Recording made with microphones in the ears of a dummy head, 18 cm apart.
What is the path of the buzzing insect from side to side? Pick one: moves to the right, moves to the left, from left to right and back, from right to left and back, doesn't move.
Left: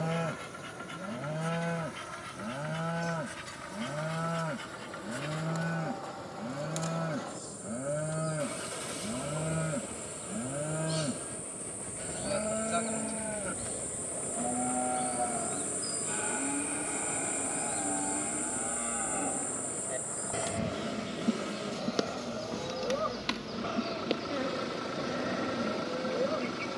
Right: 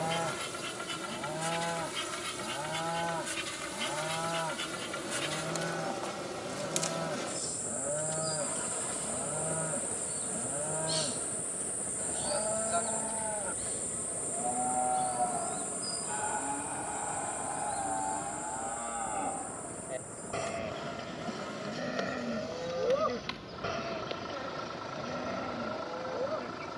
moves to the left.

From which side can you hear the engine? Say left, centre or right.
left.